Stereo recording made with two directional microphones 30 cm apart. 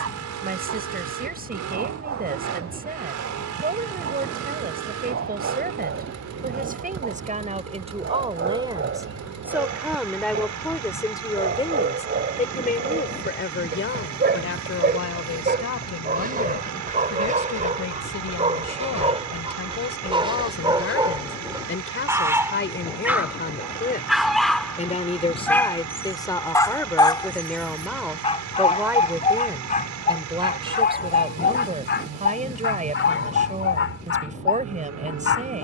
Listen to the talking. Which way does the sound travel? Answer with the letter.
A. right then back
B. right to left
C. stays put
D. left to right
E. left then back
E.